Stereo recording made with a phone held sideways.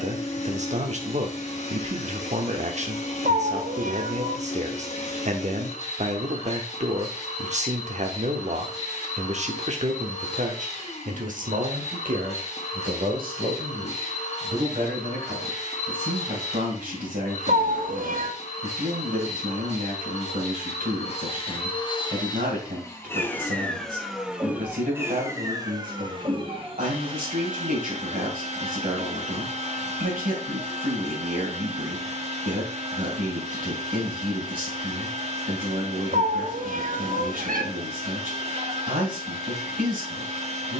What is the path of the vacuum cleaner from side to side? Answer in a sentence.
In this clip you hear the vacuum cleaner go from the left side to the right.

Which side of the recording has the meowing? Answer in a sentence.
In this clip you hear the meowing on the right.